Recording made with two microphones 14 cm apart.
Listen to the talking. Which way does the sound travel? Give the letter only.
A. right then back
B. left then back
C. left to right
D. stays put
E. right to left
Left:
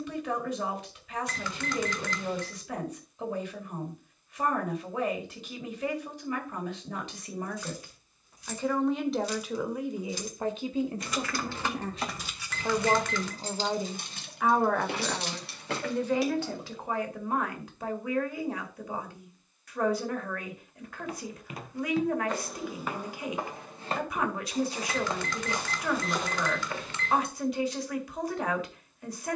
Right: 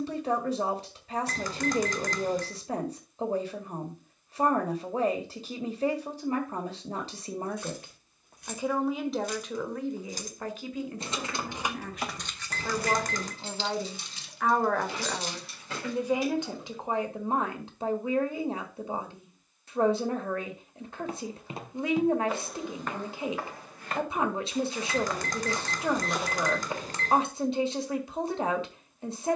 B.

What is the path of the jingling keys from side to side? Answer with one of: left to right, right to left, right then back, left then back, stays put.
right to left.